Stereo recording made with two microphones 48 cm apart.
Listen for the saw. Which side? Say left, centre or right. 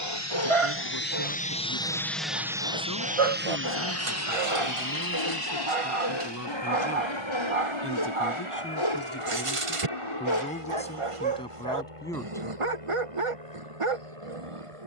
left.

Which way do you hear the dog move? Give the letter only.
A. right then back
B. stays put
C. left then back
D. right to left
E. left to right
B.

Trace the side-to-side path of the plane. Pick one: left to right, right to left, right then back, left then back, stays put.
left to right.